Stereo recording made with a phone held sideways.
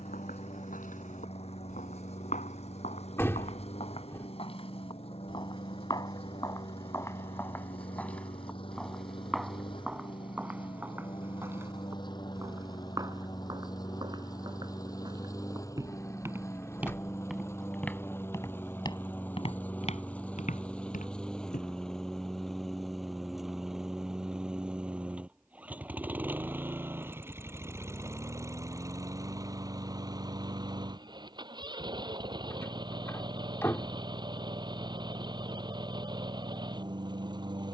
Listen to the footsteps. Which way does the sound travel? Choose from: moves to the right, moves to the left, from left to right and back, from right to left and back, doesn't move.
from left to right and back.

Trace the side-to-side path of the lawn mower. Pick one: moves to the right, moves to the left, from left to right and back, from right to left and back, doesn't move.
moves to the right.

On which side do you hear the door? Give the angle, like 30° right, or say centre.
20° left.